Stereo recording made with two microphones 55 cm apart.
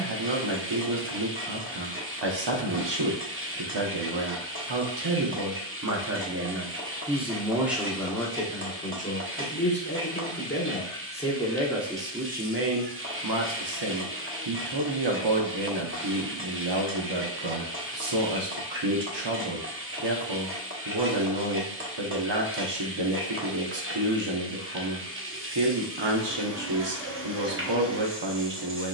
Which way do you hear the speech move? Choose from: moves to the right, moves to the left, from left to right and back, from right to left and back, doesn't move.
from right to left and back.